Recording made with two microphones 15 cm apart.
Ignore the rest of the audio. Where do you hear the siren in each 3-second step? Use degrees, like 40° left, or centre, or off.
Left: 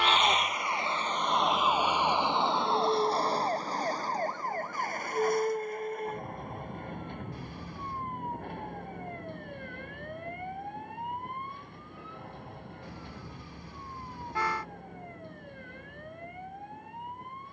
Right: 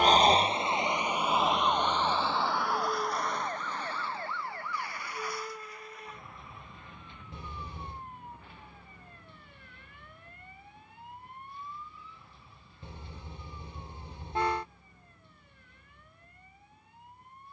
centre, 40° left, 50° left, 60° left, 60° left, 60° left.